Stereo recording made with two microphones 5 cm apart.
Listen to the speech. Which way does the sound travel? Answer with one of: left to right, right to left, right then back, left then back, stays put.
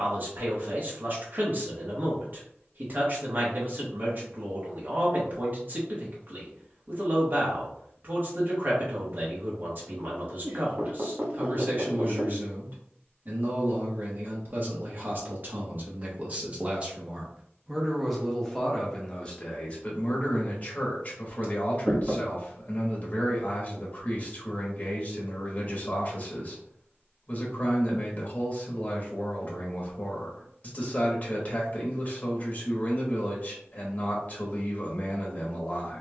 right to left.